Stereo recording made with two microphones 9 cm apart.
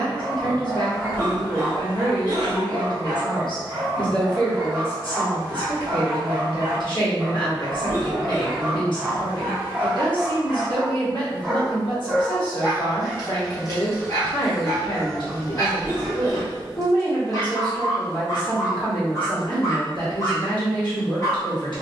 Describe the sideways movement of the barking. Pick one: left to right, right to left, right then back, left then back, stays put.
right to left.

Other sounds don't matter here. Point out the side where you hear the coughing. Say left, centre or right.
left.